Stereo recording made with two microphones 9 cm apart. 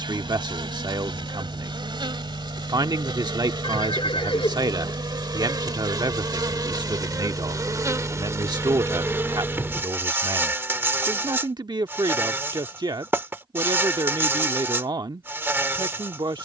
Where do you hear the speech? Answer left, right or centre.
right.